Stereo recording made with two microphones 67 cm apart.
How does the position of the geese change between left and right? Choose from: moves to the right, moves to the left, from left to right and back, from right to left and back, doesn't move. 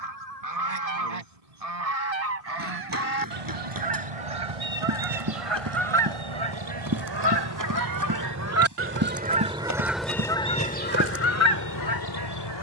moves to the left.